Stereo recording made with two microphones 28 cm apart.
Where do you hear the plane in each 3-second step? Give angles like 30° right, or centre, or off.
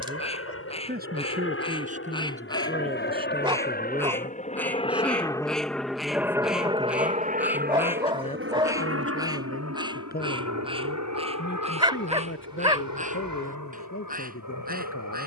50° left, 20° left, 30° right, 60° right, 70° right.